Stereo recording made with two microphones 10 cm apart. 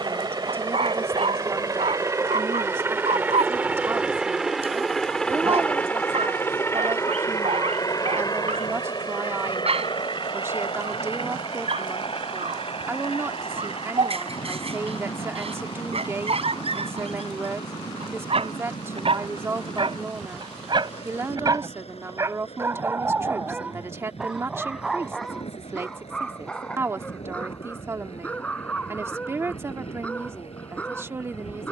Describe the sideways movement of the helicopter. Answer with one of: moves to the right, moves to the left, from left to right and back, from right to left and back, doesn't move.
moves to the left.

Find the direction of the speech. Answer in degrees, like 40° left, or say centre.
30° right.